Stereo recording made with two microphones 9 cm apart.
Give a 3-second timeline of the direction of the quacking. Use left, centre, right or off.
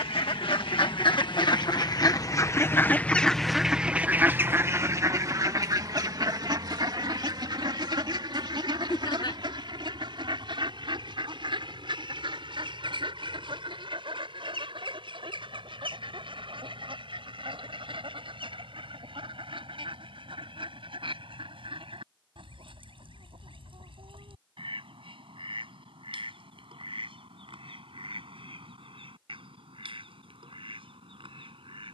left, right, right, right, right, right, right, right, right, right, right.